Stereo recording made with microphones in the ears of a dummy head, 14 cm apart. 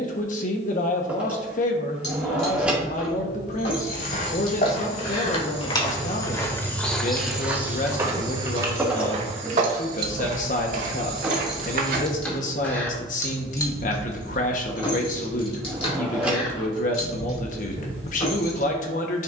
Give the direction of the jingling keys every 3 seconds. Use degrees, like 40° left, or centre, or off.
50° left, 40° left, centre, 20° right, 20° left, 40° left, 50° left.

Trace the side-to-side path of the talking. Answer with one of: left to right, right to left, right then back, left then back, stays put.
stays put.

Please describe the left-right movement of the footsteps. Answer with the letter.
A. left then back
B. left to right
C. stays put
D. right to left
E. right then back
B.